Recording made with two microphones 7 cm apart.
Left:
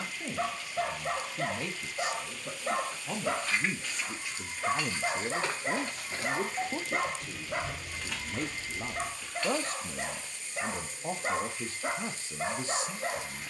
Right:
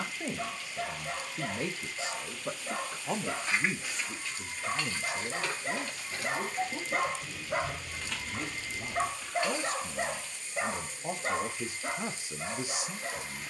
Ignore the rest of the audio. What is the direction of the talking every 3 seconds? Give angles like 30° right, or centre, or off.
30° right, 20° left, 60° left, 20° left, 10° right.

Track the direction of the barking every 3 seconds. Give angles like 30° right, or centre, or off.
60° left, 40° left, 10° right, 10° right, 50° left.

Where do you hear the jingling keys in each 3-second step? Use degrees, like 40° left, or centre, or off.
off, 10° left, 10° left, 20° right, off.